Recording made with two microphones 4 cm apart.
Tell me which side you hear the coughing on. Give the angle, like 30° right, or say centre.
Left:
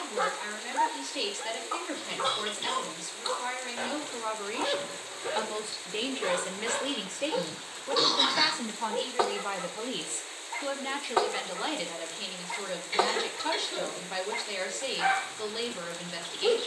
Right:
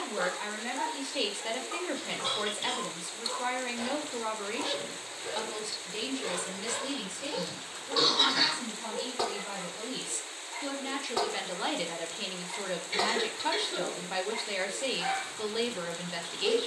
centre.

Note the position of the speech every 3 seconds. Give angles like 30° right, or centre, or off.
10° right, centre, 50° left, 20° left, 10° right, 10° right.